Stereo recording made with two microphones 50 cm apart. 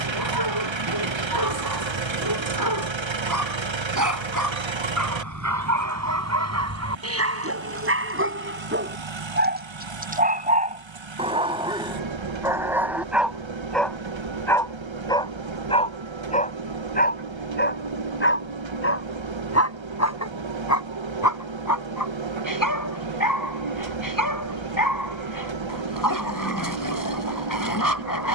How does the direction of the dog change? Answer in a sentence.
In this clip you hear the dog move from right to left.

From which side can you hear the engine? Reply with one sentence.
You can hear the engine on the right.